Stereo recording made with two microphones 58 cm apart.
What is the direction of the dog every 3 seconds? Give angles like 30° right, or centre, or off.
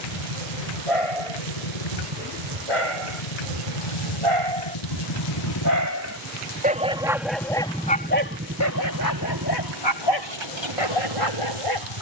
60° right, 40° right, 10° left, 50° left.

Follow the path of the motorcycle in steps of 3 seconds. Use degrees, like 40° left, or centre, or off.
80° left, 50° left, centre, 40° right.